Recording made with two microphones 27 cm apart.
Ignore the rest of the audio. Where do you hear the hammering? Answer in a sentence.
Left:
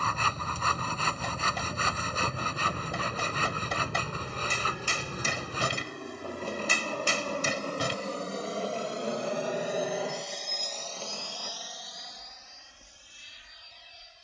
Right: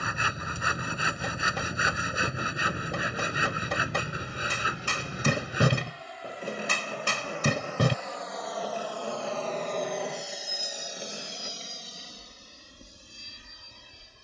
In this clip you hear the hammering on the right.